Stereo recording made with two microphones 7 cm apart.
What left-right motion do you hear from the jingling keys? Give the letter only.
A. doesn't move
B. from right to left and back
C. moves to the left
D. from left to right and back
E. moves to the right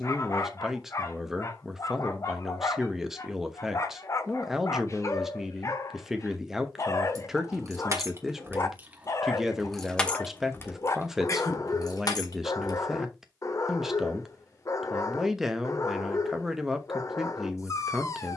C.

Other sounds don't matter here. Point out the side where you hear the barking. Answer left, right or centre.
left.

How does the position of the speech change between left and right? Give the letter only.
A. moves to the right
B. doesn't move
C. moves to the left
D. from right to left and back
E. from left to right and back
B.